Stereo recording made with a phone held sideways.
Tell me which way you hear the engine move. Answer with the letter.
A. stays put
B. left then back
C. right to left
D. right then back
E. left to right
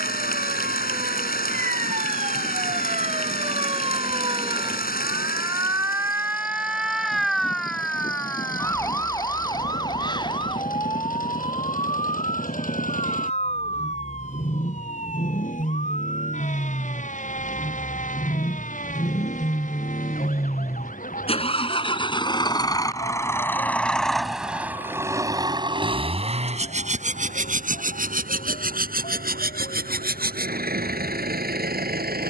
E.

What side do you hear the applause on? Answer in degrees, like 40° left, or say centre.
70° left.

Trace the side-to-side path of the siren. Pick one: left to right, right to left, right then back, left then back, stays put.
right to left.